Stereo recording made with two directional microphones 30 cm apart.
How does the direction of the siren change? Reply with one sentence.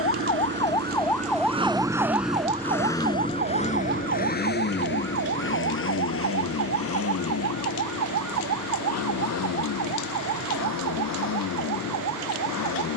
In this clip you hear the siren move to the right.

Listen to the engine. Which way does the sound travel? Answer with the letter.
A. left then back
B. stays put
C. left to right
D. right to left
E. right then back
D.